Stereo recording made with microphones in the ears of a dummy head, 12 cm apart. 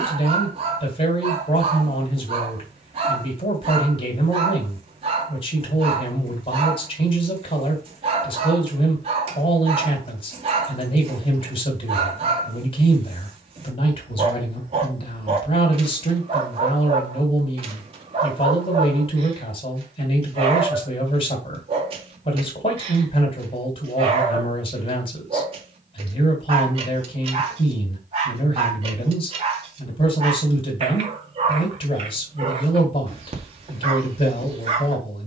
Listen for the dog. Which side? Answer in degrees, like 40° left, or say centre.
40° right.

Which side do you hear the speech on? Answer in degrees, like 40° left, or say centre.
40° left.